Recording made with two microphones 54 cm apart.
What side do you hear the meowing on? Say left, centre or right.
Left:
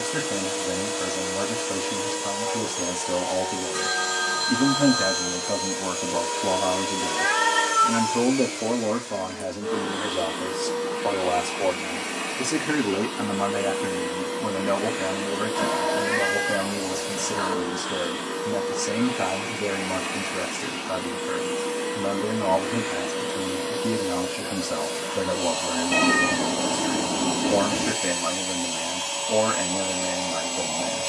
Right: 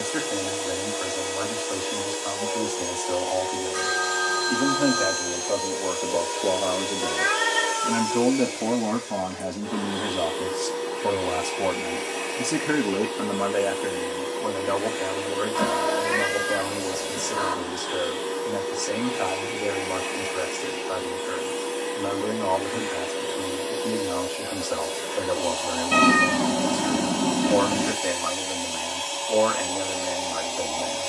right.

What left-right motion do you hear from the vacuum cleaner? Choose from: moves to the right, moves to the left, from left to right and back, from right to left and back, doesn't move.
doesn't move.